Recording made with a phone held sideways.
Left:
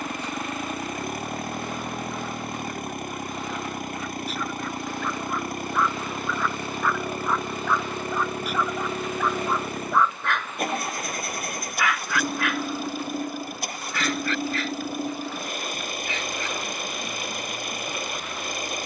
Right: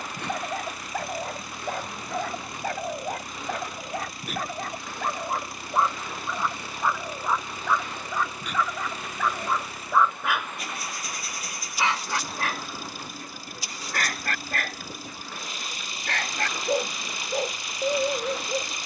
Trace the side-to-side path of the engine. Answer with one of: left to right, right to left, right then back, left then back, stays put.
stays put.